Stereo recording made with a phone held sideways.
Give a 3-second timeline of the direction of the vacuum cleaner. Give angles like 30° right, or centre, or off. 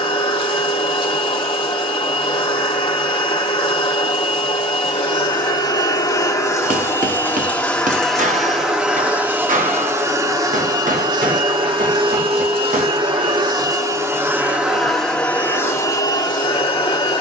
40° left, 40° left, 10° left, 30° right, 30° right, 20° left.